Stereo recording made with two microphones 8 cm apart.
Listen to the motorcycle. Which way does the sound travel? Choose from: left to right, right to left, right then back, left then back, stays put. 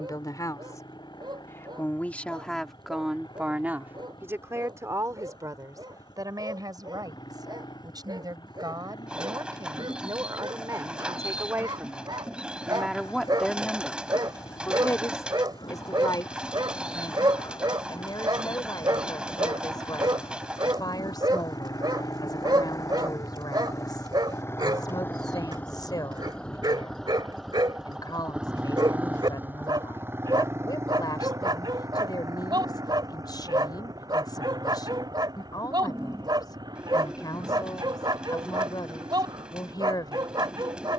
left to right.